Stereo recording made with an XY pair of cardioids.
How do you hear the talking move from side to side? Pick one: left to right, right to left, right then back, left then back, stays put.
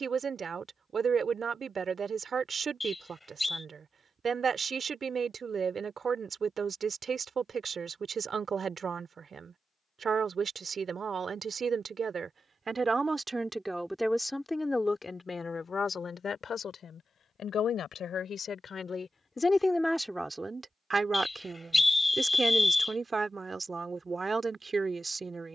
left then back.